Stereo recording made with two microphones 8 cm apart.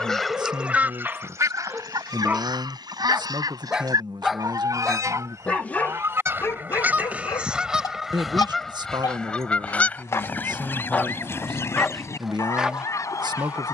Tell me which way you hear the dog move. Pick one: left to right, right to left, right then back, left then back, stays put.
left then back.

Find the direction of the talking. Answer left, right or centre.
right.